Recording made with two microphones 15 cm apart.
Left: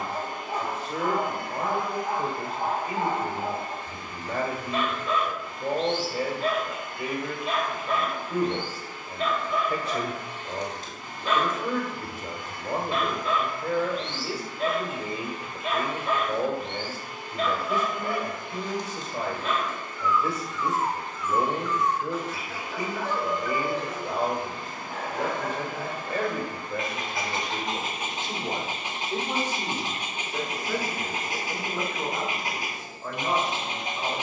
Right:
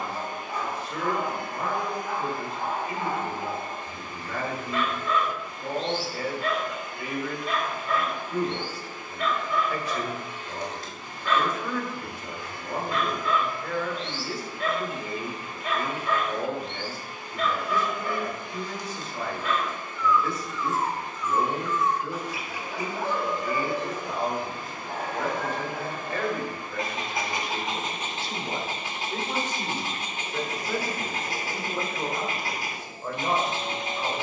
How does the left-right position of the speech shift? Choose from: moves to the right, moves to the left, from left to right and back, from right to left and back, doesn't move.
moves to the right.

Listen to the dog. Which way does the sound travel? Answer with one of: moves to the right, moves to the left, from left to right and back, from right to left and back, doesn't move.
from left to right and back.